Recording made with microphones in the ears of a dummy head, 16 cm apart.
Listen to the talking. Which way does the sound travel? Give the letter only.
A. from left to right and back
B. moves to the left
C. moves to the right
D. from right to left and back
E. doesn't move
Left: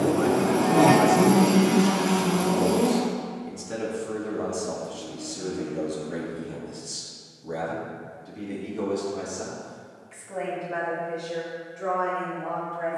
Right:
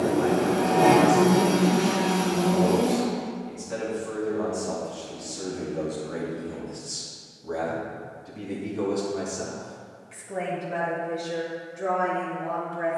C.